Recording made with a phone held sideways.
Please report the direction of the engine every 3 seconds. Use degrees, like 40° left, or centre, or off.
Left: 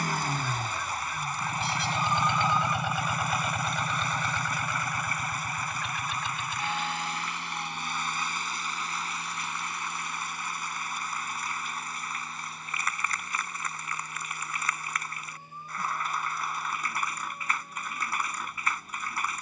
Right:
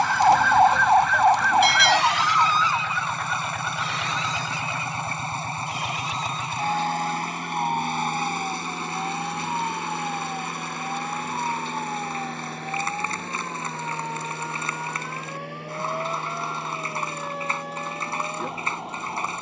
30° left, 20° right, 50° right, 70° right, 70° right, 80° right, 80° right.